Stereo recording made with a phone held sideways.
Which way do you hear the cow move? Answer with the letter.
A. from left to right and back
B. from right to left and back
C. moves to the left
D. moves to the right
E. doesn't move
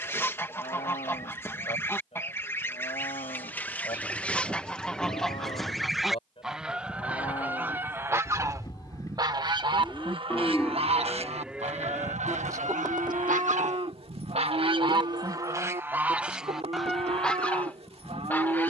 D.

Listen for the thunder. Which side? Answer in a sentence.
In this clip you hear the thunder in the centre.